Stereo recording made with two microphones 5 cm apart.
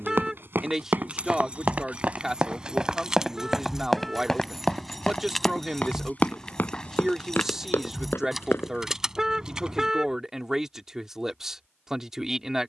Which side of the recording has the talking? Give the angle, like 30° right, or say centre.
10° right.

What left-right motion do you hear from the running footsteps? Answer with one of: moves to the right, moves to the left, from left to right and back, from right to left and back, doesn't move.
moves to the left.